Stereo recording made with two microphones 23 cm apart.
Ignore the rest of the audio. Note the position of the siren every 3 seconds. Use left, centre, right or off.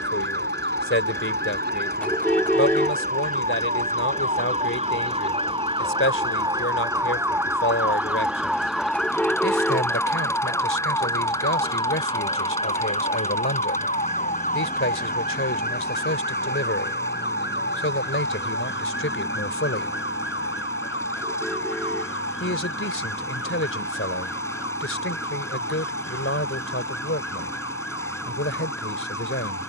right, right, centre, centre, left, left, left, left, left, left.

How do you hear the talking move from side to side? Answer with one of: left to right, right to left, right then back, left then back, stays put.
stays put.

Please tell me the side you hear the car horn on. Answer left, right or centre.
centre.